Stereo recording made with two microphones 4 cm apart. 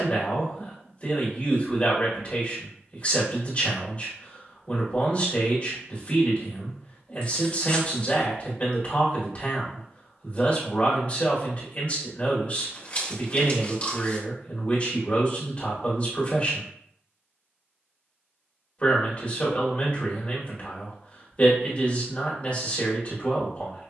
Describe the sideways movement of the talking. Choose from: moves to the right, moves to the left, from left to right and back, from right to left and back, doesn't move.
doesn't move.